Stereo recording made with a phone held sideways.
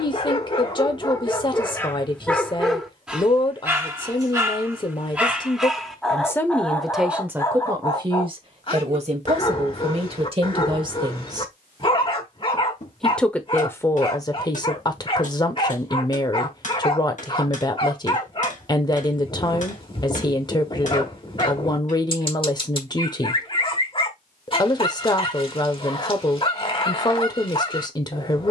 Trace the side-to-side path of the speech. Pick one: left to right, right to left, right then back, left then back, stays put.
right then back.